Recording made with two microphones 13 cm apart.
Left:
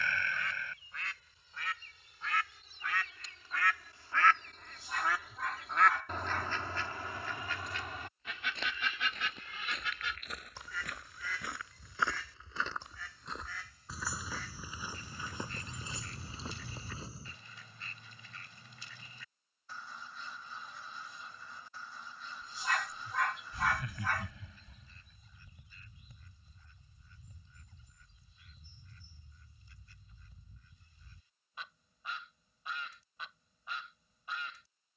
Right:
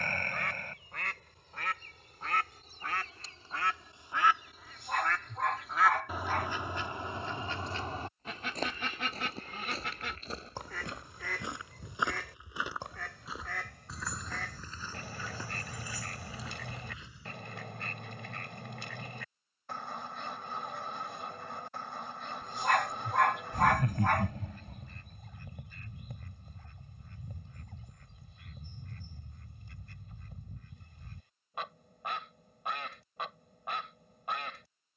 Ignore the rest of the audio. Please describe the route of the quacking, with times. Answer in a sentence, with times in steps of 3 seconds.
In this clip you hear the quacking on the right from 0 s, in the centre from 3 s and on the right from 6 s.